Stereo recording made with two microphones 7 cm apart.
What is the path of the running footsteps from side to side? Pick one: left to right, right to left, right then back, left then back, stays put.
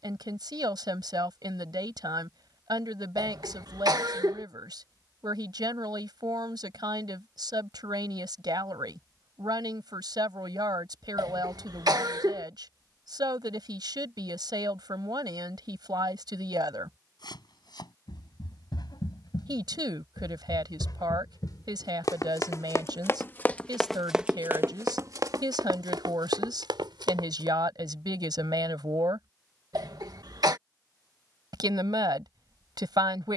left to right.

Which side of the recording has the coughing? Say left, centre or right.
right.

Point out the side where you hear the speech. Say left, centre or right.
right.